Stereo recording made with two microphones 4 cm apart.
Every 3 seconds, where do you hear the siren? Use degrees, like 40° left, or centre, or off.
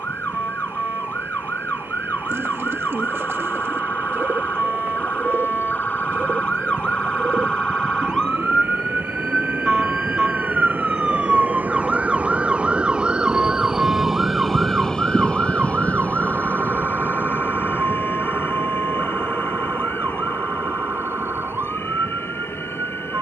50° left, 40° left, 20° left, centre, 30° right, 50° right, 60° right, 60° right.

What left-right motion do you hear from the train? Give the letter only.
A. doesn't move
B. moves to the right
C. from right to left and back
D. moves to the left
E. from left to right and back
D.